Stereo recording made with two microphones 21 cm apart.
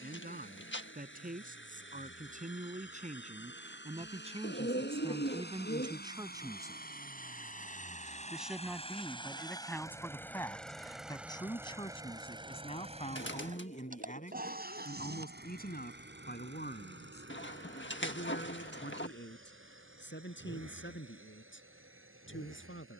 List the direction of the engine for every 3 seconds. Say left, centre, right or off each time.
left, left, left, centre, right, right, right, right.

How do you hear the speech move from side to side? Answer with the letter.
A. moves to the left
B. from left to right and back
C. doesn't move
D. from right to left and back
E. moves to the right
A.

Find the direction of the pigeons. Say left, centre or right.
left.